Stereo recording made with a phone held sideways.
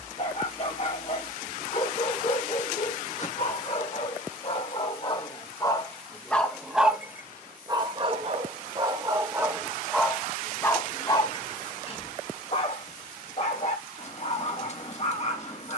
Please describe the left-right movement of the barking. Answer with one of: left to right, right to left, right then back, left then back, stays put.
right then back.